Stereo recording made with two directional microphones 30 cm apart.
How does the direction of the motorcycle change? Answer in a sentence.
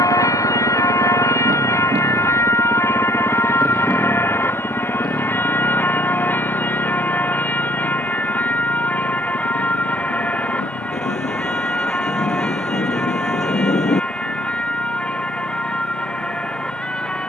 You can hear the motorcycle go from the right side to the left.